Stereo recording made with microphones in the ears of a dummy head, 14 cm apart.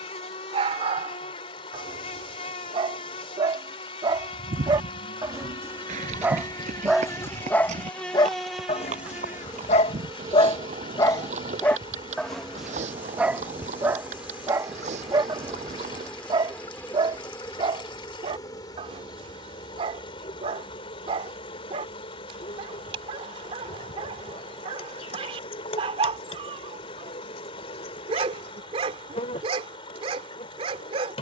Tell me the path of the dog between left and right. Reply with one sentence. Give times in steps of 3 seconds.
You can hear the dog on the right from 0 s, in the centre from 6 s, on the left from 9 s, in the centre from 12 s and on the right from 15 s.